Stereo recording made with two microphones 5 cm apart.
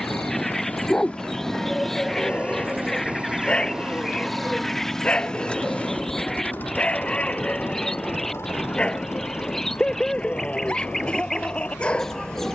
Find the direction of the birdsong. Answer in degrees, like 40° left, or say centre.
10° left.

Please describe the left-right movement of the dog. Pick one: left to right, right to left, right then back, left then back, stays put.
stays put.